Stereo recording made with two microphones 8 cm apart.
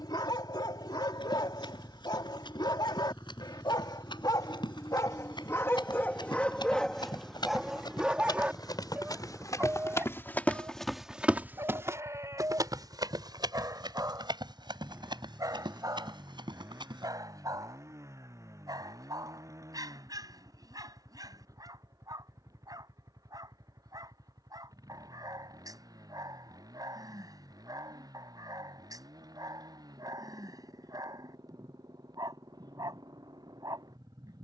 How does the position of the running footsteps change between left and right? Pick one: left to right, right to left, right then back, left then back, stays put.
left to right.